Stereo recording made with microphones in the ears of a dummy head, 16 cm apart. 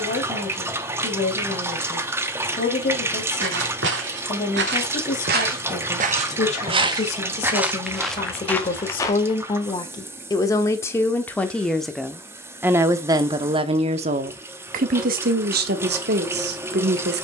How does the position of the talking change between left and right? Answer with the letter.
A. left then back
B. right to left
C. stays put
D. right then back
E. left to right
E.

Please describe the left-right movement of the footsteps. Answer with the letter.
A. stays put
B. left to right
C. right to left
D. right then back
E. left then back
C.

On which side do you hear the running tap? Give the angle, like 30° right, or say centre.
10° right.